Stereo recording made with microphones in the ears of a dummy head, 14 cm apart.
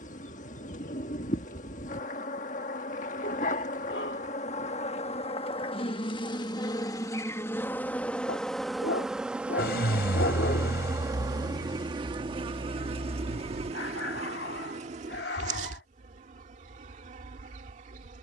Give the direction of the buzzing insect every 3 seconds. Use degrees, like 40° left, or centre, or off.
50° left, 50° left, 20° left, 20° right, 40° right, 50° right.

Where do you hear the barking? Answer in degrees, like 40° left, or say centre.
80° left.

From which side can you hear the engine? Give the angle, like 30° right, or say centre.
70° left.